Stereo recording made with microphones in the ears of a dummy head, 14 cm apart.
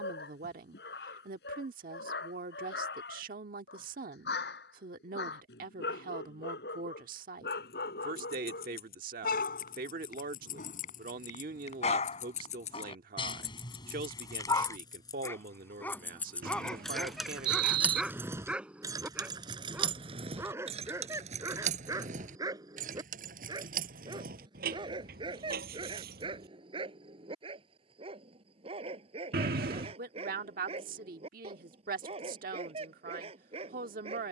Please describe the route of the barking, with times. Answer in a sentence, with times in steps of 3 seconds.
You can hear the barking on the left from 0 s, in the centre from 15 s and on the right from 21 s.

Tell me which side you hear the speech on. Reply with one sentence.
In this clip you hear the speech on the right.